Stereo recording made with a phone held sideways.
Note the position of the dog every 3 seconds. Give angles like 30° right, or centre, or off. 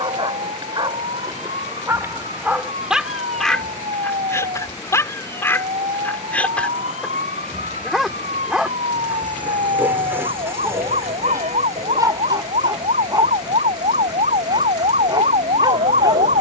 30° right, 10° left, centre, 20° right, 30° right, 30° right.